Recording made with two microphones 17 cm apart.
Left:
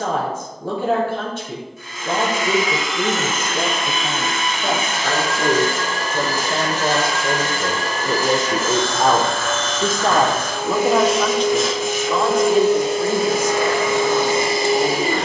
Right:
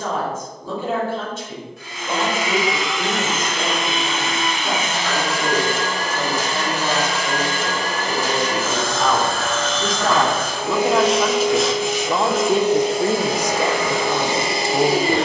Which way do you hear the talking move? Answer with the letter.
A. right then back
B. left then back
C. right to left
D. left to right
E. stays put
D.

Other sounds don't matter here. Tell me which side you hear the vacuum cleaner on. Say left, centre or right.
right.